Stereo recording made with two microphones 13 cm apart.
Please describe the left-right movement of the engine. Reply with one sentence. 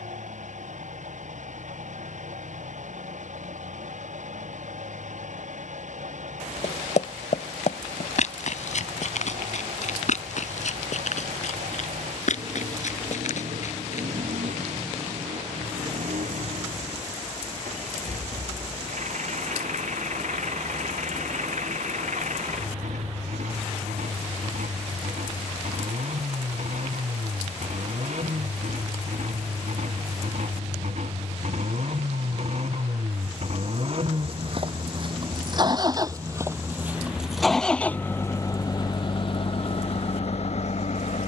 In this clip you hear the engine travel towards the left.